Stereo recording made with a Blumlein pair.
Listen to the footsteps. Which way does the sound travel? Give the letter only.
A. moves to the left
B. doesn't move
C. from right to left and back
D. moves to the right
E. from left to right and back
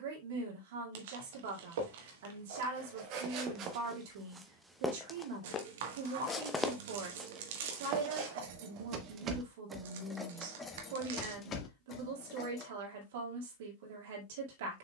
C.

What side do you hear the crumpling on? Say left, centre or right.
right.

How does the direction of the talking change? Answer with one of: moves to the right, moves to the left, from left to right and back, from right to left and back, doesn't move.
doesn't move.